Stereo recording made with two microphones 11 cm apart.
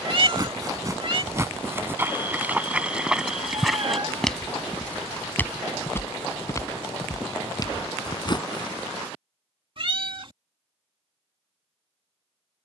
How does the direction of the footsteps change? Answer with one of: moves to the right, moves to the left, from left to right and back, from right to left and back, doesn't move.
moves to the left.